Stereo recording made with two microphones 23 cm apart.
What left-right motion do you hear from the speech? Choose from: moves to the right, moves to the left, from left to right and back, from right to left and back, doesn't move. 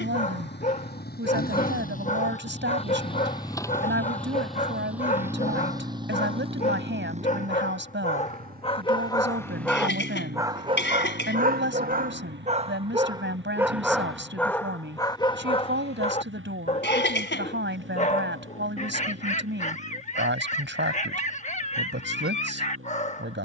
doesn't move.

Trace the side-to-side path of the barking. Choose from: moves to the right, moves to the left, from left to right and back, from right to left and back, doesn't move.
from left to right and back.